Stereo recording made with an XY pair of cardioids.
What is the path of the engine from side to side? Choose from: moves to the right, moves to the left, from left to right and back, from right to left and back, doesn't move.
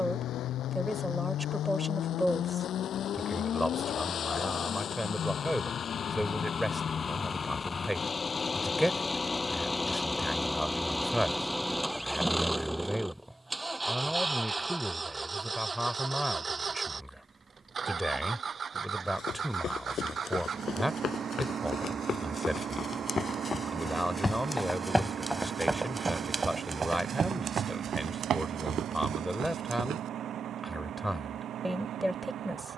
moves to the right.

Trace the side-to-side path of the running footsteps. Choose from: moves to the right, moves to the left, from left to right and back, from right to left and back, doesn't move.
moves to the right.